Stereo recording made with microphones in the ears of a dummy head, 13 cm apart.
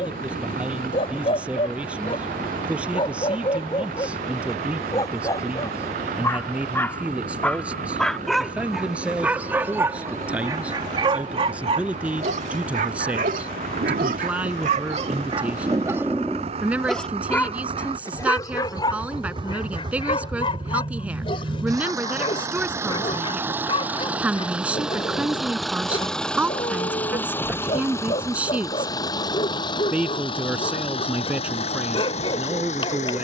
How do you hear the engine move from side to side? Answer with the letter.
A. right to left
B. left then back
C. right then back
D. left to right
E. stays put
A.